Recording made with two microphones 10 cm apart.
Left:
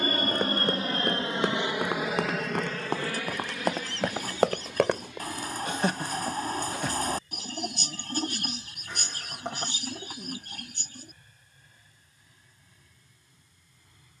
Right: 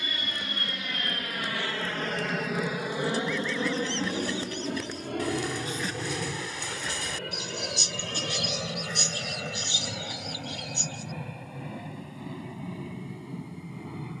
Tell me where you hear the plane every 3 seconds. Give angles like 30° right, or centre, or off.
20° left, 40° right, 60° right, 70° right, 80° right.